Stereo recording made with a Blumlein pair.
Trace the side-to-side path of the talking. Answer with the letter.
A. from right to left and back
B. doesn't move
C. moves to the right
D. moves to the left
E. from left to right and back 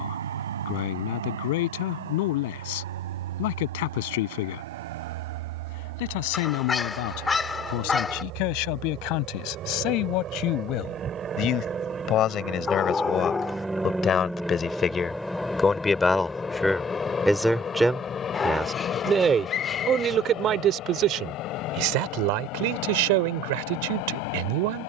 C.